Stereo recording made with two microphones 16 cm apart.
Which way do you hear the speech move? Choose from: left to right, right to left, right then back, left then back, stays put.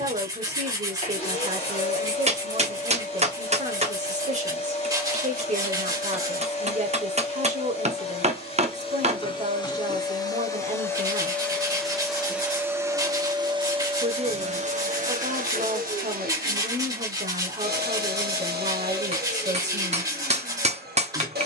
stays put.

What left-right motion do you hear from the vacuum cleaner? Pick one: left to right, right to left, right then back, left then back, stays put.
left to right.